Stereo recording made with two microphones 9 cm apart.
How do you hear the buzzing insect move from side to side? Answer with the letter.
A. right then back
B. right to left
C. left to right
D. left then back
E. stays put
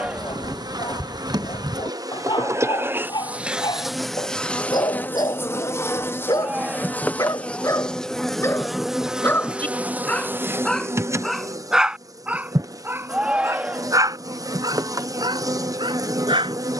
D.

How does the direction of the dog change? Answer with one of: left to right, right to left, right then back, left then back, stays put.
left to right.